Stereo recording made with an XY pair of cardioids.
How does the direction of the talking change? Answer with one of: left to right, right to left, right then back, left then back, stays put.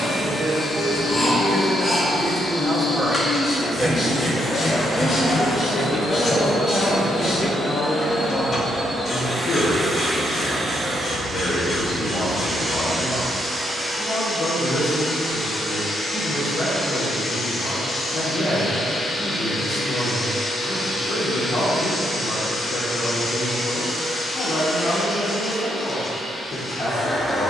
right to left.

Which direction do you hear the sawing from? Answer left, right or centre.
left.